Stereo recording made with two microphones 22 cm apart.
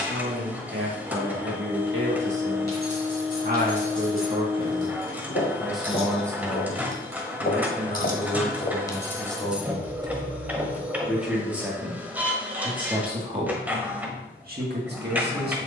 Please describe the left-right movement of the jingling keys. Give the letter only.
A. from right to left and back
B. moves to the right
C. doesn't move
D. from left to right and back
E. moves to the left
B.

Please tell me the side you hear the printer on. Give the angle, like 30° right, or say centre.
10° right.